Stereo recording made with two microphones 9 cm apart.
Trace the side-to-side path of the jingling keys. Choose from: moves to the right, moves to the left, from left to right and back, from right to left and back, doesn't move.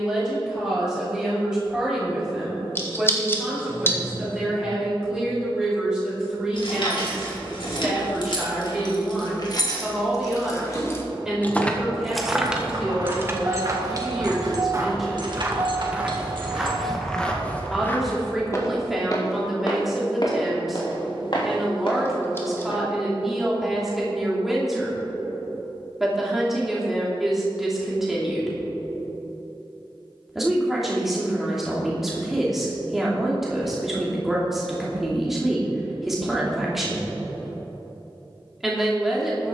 moves to the right.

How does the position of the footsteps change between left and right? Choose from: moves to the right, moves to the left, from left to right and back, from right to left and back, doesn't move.
moves to the left.